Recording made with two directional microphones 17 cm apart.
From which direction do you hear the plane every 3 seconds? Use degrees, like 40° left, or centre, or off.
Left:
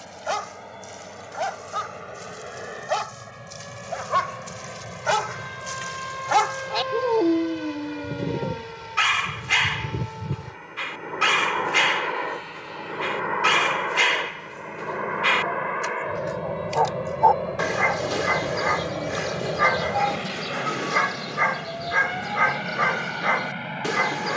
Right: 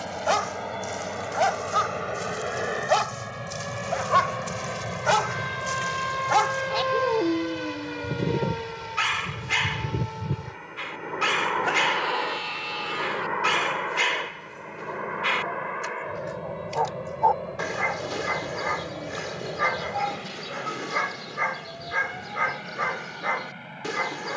50° right, 40° right, 20° right, centre, 10° left, 30° left, 40° left, 50° left.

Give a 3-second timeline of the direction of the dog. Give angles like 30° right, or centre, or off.
30° right, 10° right, 20° left, 20° left, 20° left, 20° left, 20° left, 20° left.